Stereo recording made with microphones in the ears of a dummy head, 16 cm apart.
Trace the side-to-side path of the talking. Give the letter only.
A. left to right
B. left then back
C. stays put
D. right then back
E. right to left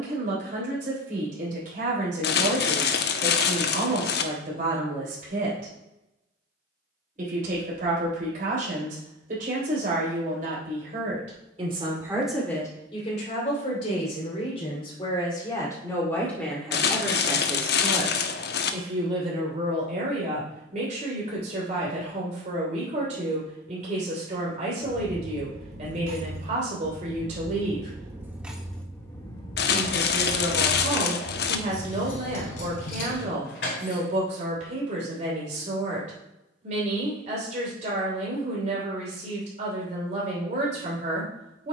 B.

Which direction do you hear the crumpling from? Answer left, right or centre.
left.